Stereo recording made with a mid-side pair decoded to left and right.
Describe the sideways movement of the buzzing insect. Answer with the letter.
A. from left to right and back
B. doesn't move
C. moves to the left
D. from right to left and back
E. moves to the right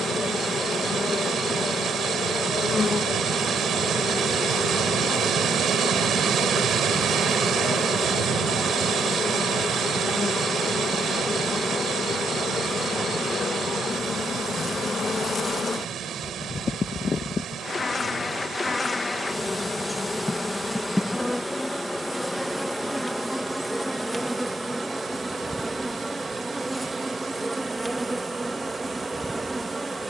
E.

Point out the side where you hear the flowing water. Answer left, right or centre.
right.